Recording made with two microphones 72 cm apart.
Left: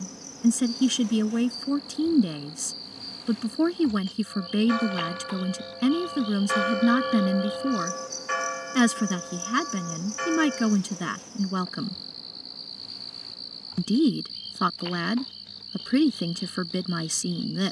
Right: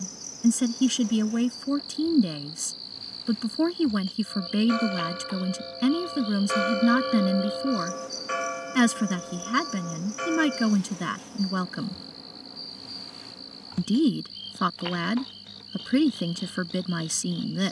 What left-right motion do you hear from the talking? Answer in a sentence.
You can hear the talking stay put.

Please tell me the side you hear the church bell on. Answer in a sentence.
In this clip you hear the church bell on the left.